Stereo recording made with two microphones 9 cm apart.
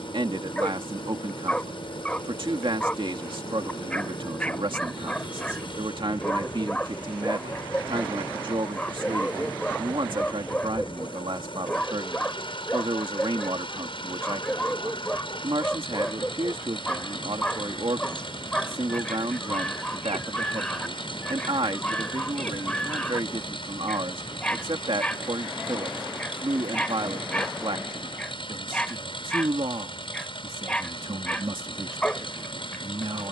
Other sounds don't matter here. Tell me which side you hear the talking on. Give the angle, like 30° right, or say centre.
80° right.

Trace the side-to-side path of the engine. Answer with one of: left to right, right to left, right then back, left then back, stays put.
stays put.